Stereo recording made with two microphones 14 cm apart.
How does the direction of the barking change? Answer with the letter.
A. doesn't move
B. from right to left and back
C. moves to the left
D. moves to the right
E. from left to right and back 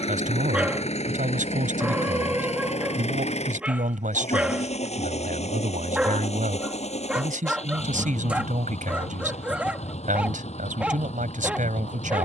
A.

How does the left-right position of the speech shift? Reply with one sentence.
In this clip you hear the speech stay put.